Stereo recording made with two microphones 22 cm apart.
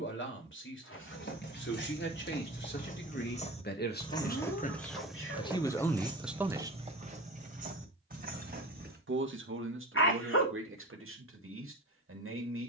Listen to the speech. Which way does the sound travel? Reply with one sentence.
In this clip you hear the speech travel towards the right.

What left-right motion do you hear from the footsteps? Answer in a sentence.
You can hear the footsteps travel towards the right.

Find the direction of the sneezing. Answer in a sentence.
You can hear the sneezing on the left.